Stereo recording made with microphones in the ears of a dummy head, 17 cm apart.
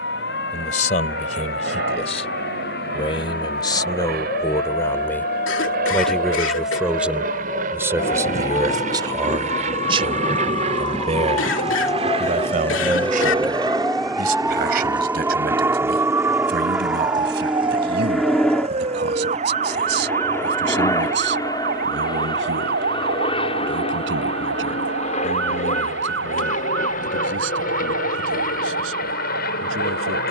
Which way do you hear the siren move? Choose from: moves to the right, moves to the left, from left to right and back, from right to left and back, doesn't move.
moves to the right.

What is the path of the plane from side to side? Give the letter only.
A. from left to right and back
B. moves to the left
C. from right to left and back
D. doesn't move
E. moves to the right
B.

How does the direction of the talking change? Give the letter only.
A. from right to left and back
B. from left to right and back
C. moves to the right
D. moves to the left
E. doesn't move
C.